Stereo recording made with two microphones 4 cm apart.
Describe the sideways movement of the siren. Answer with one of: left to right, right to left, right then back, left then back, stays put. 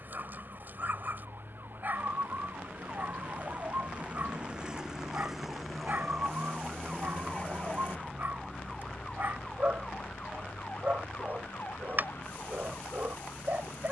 right to left.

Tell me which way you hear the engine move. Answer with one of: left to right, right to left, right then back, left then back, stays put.
right to left.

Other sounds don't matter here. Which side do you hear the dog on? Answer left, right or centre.
right.